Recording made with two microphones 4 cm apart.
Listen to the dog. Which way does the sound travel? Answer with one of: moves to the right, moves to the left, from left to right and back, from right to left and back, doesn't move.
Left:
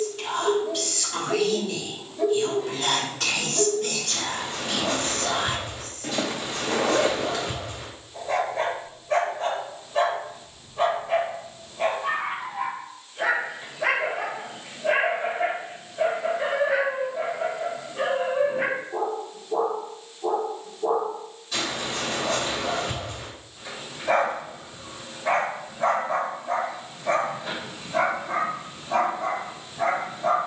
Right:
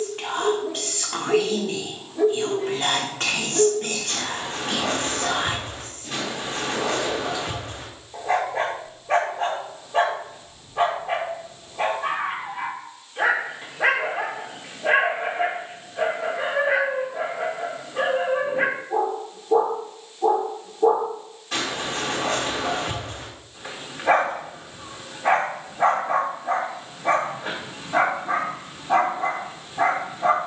doesn't move.